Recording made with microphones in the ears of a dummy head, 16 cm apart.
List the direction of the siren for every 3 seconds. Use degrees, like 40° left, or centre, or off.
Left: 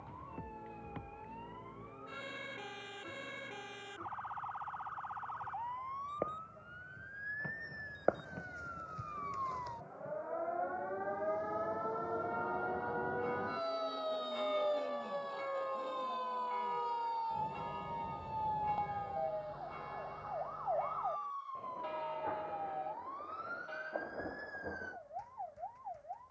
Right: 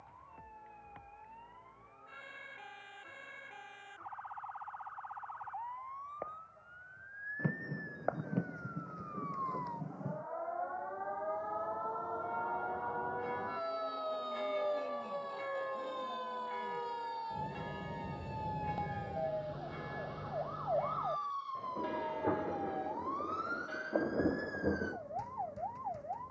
60° left, 50° left, 40° left, 30° left, 20° left, 10° right, 30° right, 50° right, 60° right.